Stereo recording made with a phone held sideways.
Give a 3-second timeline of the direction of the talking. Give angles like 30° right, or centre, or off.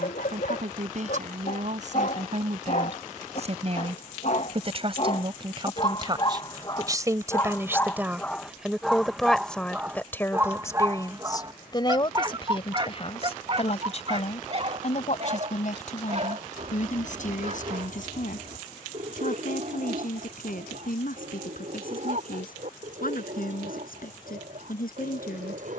60° right, 40° right, 20° right, 20° left, 40° left, 60° left, 70° left, 70° left, 80° left.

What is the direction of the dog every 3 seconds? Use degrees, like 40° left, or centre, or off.
70° left, 50° left, 20° left, 20° right, 40° right, 50° right, 60° right, 60° right, 60° right.